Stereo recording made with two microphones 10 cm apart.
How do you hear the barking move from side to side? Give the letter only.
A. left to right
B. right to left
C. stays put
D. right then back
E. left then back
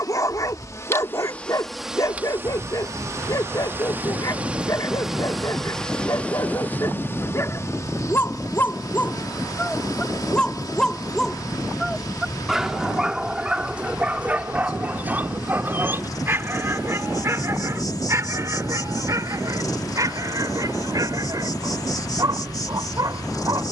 A.